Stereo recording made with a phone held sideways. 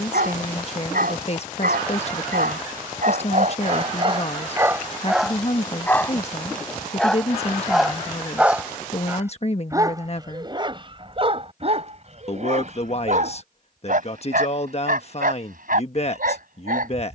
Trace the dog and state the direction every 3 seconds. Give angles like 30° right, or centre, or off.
70° right, 30° right, centre, 30° right, 60° right, 70° right.